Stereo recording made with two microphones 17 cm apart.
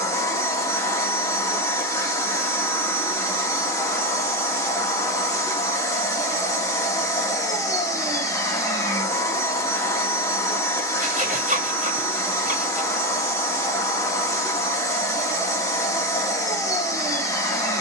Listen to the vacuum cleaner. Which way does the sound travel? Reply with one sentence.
You can hear the vacuum cleaner stay put.